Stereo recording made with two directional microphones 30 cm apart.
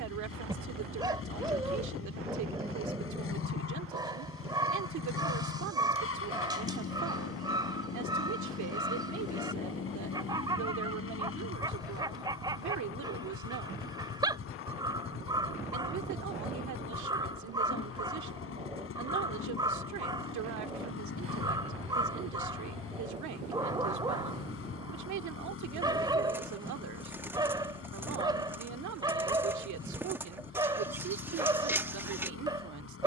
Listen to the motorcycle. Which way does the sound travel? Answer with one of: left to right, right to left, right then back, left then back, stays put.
stays put.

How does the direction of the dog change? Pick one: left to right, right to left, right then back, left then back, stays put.
stays put.